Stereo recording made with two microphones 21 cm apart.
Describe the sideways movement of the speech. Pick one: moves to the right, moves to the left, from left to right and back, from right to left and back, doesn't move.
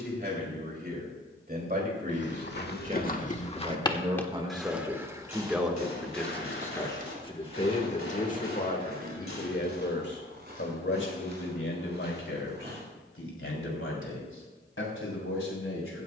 moves to the left.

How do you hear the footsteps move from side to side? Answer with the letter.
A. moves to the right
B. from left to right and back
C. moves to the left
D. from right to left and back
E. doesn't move
A.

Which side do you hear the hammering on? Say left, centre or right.
left.